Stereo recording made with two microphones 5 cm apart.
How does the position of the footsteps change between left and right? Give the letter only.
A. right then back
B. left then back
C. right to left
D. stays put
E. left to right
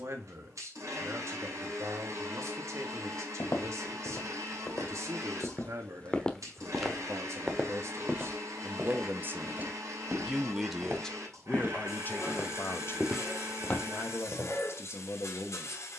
A.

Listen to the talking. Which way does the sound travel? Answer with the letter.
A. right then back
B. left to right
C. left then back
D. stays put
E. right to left
E.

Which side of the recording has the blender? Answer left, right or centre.
right.